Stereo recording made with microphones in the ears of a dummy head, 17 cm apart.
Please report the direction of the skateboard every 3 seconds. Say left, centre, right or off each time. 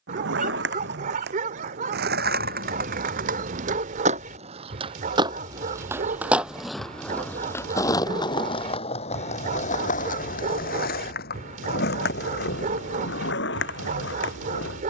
right, right, centre, left, left.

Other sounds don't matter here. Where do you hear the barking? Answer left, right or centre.
right.